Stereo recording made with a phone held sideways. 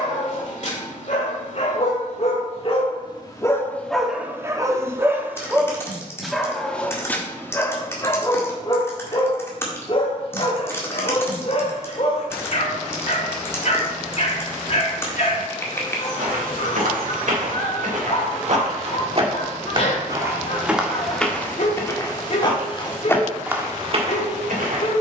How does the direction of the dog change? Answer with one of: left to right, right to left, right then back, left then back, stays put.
right then back.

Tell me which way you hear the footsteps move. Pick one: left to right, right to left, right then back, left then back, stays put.
left then back.